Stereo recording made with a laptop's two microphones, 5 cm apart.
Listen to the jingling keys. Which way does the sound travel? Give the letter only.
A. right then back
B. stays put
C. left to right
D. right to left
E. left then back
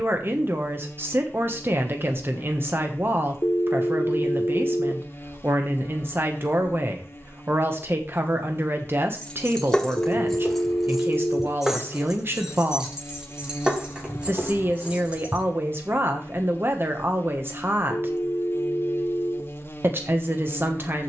C.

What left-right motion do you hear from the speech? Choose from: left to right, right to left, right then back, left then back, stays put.
stays put.